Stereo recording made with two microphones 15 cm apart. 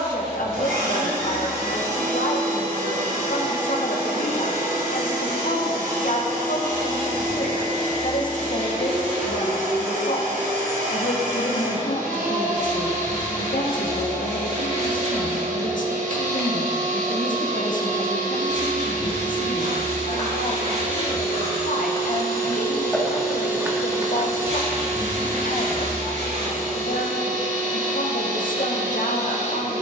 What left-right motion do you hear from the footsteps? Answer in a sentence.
In this clip you hear the footsteps travel towards the right.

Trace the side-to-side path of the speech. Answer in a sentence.
You can hear the speech stay in one place.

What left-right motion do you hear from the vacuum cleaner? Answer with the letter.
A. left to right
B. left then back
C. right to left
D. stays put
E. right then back
D.